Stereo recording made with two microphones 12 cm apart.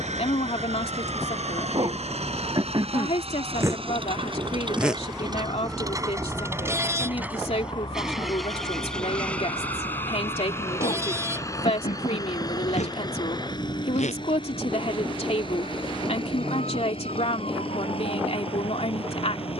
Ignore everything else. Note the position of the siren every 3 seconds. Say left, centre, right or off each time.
right, centre, left, left, left, left, left.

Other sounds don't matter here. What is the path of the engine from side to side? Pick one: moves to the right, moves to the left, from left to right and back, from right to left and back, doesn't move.
moves to the left.